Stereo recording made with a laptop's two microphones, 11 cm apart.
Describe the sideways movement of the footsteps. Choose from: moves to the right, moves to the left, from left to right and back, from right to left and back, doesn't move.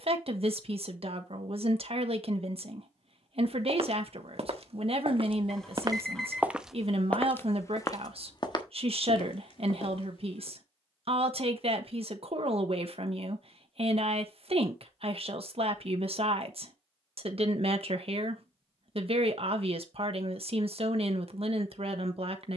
moves to the left.